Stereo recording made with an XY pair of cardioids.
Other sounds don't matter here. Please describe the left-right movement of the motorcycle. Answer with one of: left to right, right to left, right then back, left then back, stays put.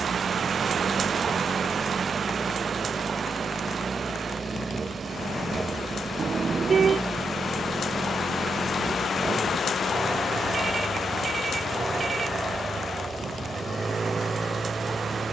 stays put.